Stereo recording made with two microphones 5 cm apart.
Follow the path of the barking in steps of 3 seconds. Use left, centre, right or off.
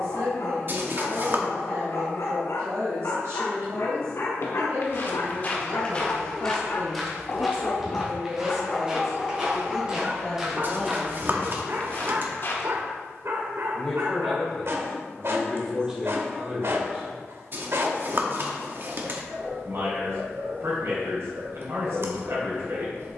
left, left, left, right, right, right, right, right.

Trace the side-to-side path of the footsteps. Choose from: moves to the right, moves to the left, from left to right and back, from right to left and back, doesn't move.
from left to right and back.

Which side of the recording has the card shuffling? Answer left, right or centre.
right.